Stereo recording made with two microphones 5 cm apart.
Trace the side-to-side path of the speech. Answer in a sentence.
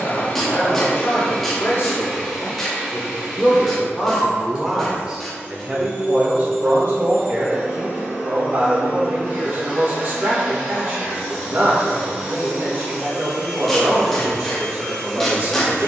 In this clip you hear the speech travel towards the right.